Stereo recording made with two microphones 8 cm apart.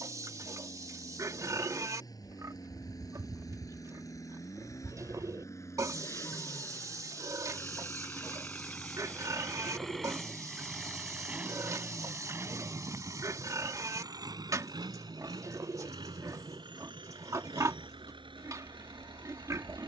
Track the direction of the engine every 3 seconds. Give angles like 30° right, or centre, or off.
50° left, 40° left, 30° left, centre, 40° right, 70° right, 80° right.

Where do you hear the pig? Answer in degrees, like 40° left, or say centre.
40° right.